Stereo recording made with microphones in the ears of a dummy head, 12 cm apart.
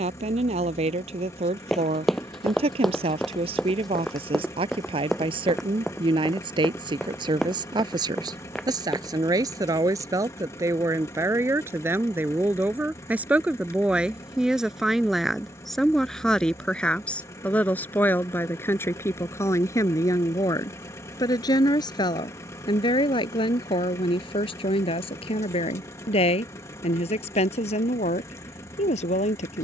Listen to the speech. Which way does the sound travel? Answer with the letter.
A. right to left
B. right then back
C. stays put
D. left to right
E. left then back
A.